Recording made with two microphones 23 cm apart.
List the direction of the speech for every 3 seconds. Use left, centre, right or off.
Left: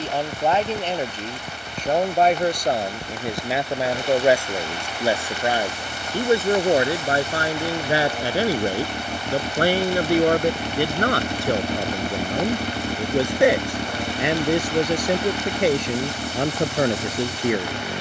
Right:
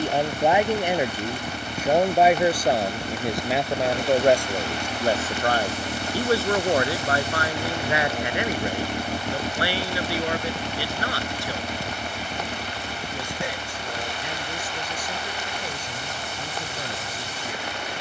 centre, centre, left, left, left, left.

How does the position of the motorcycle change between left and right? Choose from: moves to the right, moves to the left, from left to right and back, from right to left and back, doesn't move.
moves to the left.